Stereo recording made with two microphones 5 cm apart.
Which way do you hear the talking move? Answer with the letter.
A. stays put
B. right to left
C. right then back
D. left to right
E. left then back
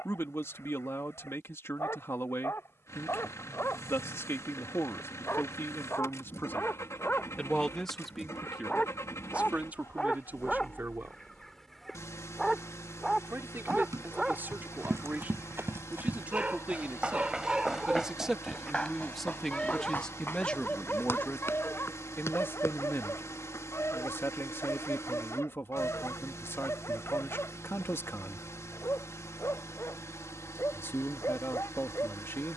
C.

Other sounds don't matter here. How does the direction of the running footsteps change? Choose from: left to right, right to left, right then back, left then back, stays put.
right to left.